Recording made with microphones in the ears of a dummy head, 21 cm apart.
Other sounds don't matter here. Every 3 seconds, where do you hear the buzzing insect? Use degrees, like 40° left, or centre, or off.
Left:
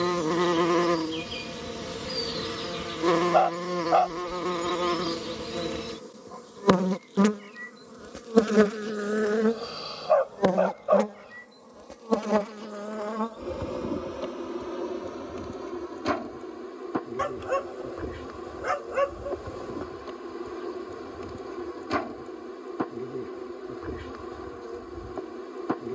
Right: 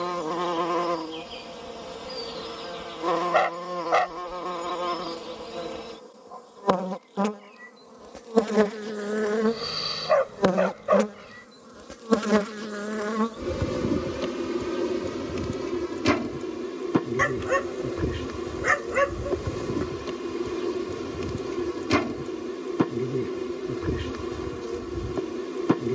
30° left, 30° left, 20° left, 10° right, 30° right, 40° right, 40° right, 40° right, 40° right.